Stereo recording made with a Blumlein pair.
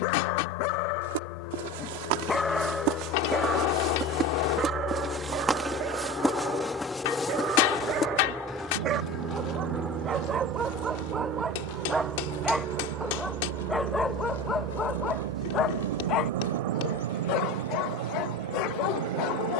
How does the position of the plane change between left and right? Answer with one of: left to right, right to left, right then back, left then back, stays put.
left to right.